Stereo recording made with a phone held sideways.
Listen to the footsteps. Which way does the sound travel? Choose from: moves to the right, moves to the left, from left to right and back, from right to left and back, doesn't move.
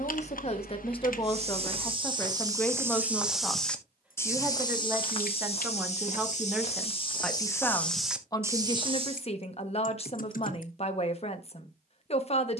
from right to left and back.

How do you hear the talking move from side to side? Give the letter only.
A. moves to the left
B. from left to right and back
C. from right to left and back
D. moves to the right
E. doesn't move
B.